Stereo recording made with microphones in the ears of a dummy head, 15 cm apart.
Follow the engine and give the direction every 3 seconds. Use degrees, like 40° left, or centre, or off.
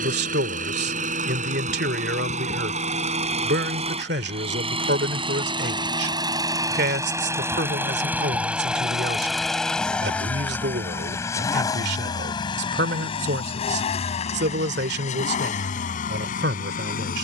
50° right, 30° right, 10° right, 10° left, 40° left, 50° left.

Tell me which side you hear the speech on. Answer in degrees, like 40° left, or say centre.
70° right.